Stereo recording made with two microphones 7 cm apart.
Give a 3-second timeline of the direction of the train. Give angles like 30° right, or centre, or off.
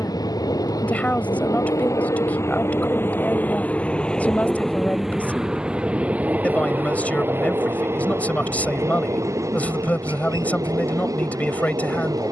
50° left, 10° left, 30° right, 50° right.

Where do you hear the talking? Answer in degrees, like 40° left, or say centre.
20° left.